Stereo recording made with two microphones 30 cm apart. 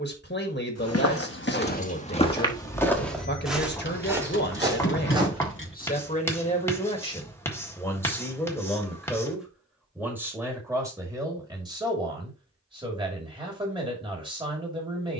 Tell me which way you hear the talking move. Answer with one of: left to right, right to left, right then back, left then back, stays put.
left to right.